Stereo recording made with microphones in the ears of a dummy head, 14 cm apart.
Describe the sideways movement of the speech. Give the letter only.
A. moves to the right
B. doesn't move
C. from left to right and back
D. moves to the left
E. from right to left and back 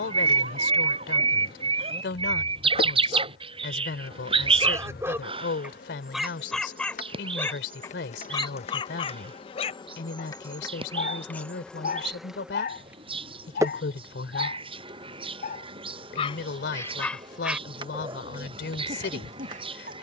B.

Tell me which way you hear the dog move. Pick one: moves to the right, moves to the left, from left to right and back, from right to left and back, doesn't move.
from right to left and back.